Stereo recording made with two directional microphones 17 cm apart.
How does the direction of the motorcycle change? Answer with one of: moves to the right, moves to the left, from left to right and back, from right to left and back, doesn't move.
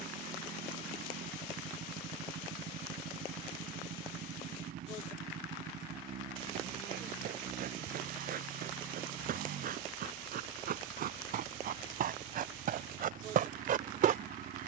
doesn't move.